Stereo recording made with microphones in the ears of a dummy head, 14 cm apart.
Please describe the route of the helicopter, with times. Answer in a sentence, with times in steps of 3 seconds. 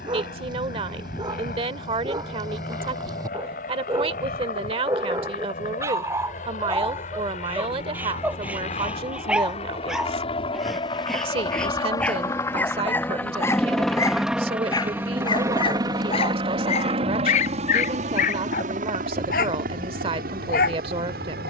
In this clip you hear the helicopter on the left from 0 s, in the centre from 12 s and on the right from 15 s.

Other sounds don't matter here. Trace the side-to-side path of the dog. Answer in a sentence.
You can hear the dog go from the right side to the left.